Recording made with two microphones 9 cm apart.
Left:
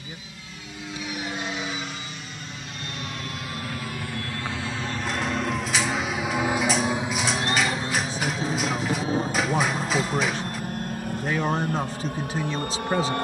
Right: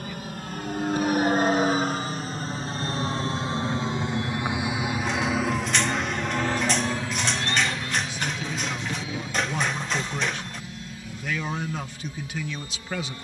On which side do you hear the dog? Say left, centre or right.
centre.